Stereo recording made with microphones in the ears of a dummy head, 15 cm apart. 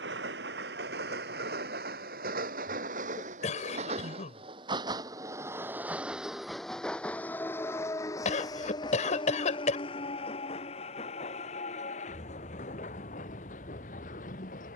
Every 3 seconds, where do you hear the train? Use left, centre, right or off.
right, right, centre, left, left.